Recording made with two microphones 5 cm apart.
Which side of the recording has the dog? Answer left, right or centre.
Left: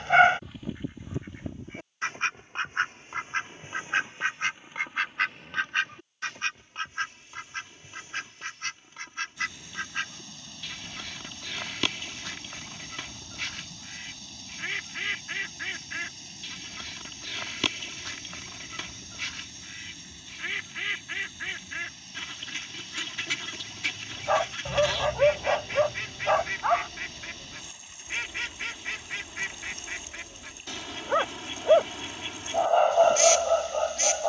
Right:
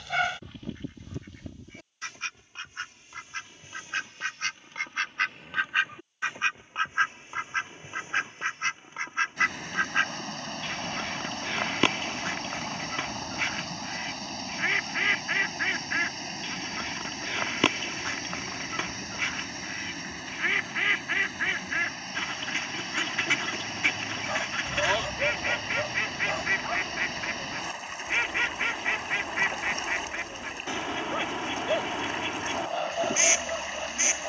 left.